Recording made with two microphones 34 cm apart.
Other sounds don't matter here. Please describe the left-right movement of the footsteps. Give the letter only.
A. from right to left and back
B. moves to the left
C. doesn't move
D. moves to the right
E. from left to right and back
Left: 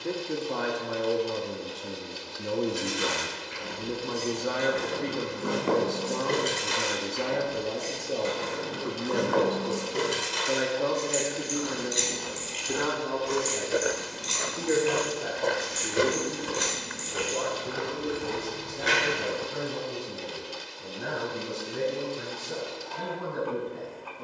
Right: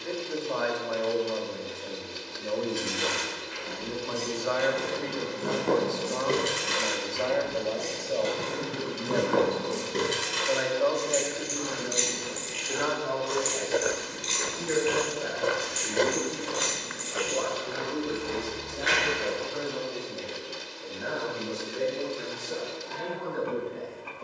E.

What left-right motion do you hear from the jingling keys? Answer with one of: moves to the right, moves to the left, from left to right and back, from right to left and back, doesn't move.
from left to right and back.